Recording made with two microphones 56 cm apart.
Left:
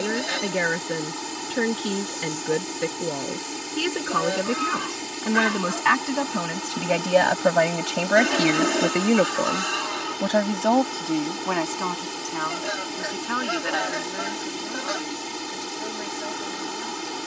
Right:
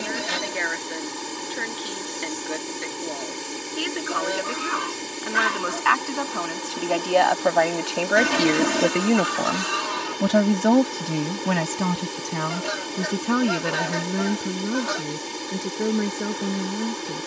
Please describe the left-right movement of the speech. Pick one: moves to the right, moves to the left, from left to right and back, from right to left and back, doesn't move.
moves to the right.